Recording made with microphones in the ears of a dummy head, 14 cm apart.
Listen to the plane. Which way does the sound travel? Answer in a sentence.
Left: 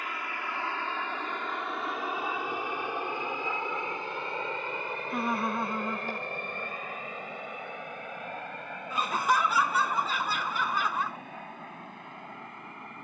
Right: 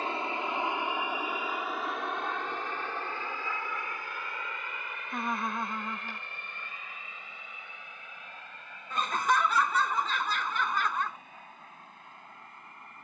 You can hear the plane move to the left.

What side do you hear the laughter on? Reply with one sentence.
You can hear the laughter in the centre.